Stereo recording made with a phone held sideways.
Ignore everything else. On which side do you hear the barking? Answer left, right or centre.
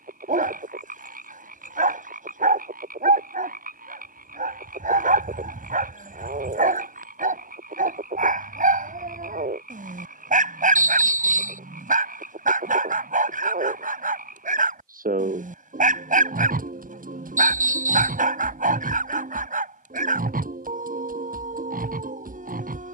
right.